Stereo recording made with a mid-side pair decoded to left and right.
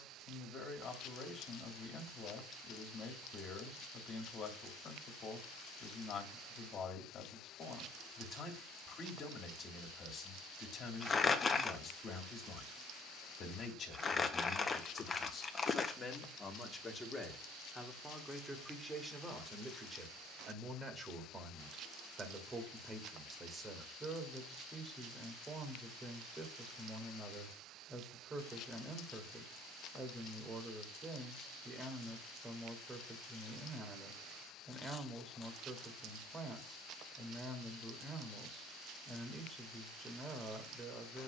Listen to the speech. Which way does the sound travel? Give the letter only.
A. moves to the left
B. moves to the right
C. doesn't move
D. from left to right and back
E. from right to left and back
B.